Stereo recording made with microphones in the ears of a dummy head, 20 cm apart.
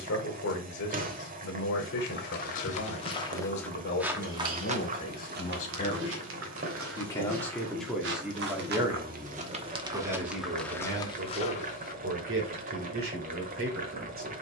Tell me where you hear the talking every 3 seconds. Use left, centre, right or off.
left, left, centre, right, right.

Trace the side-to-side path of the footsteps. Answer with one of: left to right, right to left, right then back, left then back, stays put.
right then back.